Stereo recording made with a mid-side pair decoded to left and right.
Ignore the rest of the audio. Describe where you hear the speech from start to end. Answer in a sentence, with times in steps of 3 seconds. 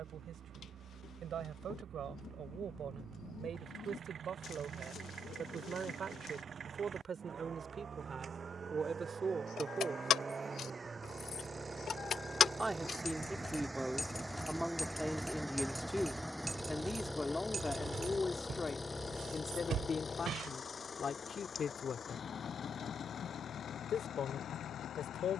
You can hear the speech on the right from 0 s, in the centre from 12 s and on the left from 18 s.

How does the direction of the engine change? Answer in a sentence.
In this clip you hear the engine travel towards the left.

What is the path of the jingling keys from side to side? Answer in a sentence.
In this clip you hear the jingling keys move from left to right.